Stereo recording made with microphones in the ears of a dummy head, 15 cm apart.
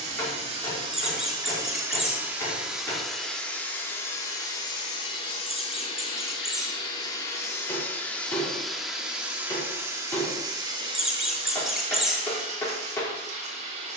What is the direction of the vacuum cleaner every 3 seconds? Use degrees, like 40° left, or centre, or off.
20° right, 20° left, 20° left, 20° right, 40° right.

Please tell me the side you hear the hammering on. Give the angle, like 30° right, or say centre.
10° left.